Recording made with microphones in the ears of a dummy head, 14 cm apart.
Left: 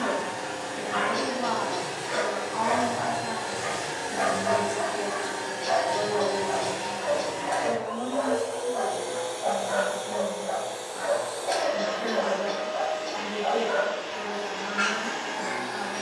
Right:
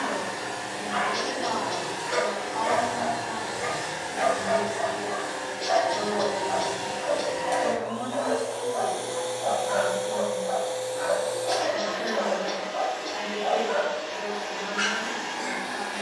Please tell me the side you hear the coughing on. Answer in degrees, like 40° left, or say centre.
40° right.